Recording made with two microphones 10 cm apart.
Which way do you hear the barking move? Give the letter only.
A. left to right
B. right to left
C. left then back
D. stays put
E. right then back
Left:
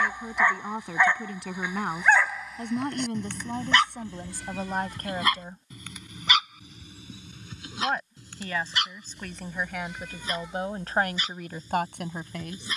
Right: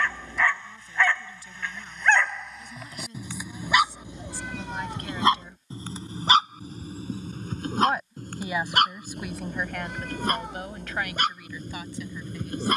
A.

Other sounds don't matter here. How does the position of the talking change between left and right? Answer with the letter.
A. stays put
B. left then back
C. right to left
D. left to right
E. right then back
E.